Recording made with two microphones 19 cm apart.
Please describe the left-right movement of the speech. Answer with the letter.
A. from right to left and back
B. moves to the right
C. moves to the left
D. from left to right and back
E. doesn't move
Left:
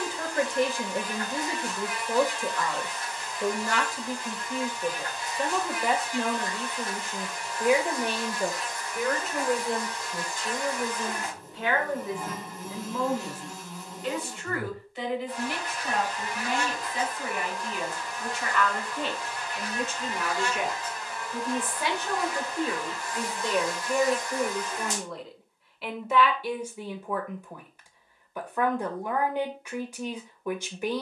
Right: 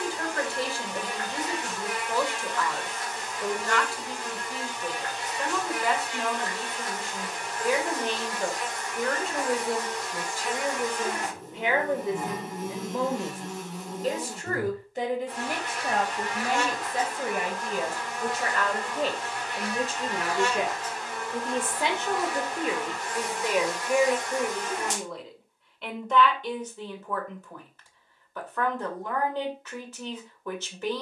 D.